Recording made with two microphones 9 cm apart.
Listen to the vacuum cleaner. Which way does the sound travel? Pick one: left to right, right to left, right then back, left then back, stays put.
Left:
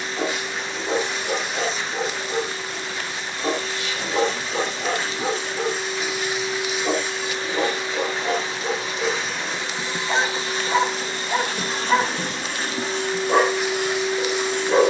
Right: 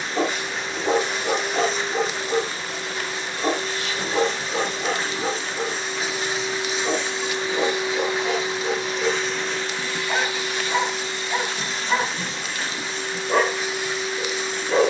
right to left.